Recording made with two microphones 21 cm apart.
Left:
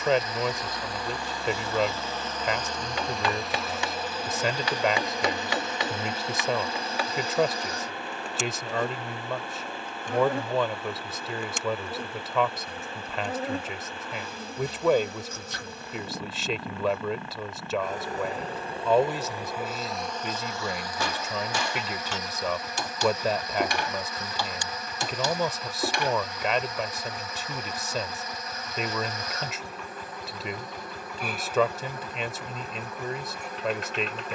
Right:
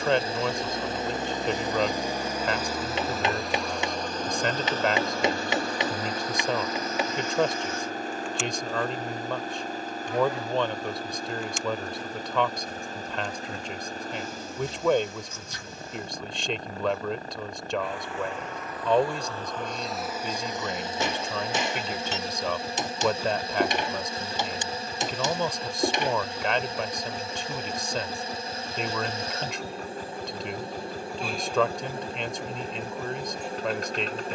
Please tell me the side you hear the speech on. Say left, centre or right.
centre.